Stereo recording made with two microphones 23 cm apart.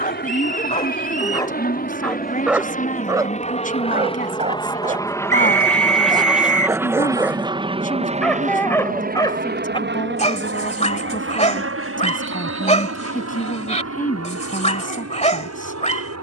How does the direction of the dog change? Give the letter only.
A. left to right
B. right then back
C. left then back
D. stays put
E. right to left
B.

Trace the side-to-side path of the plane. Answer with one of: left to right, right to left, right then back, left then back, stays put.
left to right.